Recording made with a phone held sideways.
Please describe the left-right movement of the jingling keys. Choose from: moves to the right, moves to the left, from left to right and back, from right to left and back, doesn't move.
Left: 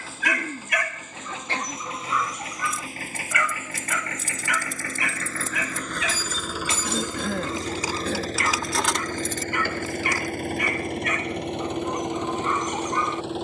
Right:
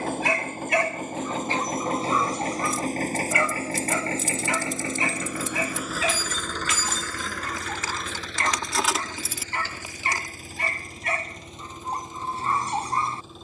moves to the right.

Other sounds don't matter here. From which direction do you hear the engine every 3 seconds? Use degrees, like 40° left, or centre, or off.
50° right, 30° right, 30° left, 70° left, 80° left.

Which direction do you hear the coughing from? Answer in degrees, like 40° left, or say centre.
70° left.